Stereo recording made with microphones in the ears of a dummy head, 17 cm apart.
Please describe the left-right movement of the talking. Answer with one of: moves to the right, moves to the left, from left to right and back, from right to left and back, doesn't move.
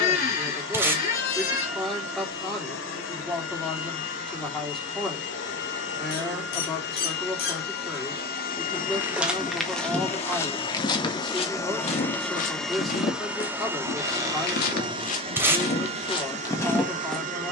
doesn't move.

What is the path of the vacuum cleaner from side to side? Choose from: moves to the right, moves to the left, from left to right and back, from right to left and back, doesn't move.
moves to the right.